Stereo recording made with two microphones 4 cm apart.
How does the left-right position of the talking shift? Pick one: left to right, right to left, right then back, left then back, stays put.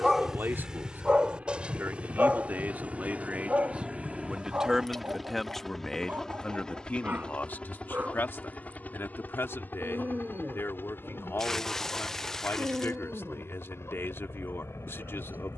right to left.